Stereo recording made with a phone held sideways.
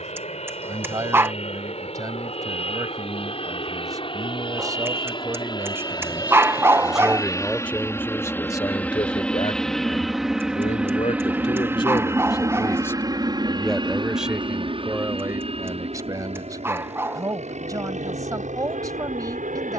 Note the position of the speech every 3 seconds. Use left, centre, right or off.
right, right, centre, left, centre, right, right.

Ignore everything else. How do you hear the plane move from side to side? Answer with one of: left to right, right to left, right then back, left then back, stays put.
left to right.